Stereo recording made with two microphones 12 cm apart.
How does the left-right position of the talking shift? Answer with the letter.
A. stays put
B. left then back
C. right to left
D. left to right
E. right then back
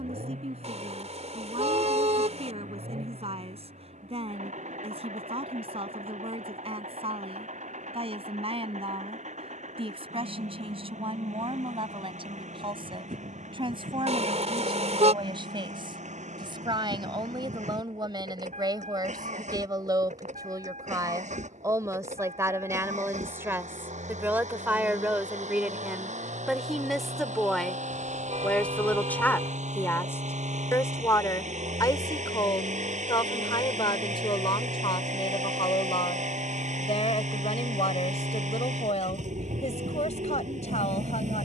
C.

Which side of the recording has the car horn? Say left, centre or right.
right.